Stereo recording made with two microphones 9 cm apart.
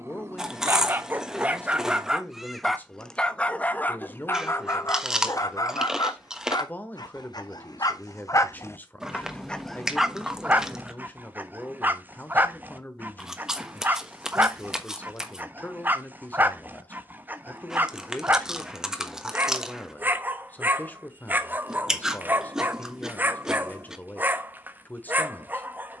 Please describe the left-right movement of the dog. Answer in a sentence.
In this clip you hear the dog go left and come back.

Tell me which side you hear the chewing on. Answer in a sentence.
In this clip you hear the chewing in the centre.